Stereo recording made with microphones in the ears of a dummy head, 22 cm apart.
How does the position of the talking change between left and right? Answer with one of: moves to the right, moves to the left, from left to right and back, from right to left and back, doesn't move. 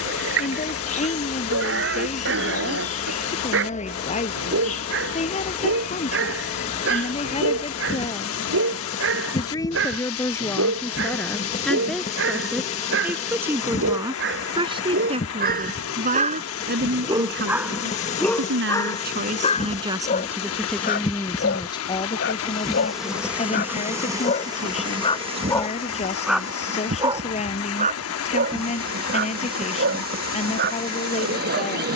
from left to right and back.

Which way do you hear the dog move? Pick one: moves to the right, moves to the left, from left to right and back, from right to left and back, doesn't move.
from right to left and back.